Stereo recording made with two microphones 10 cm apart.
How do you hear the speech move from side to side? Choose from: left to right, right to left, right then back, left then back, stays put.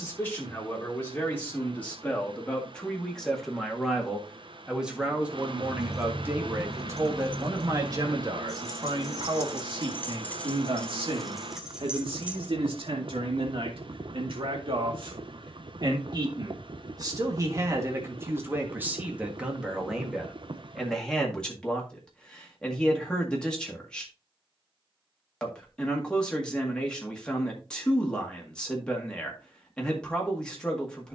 right then back.